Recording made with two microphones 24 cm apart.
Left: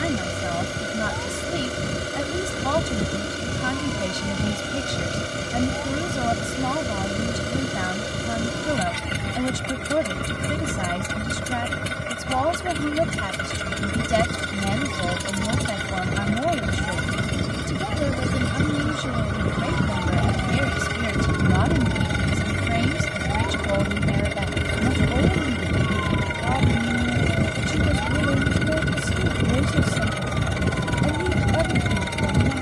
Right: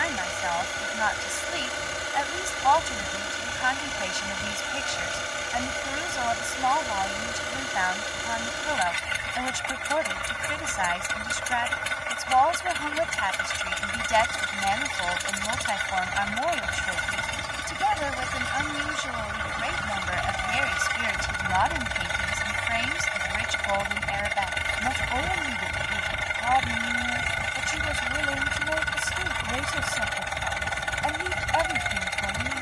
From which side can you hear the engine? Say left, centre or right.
left.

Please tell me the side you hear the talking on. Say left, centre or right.
left.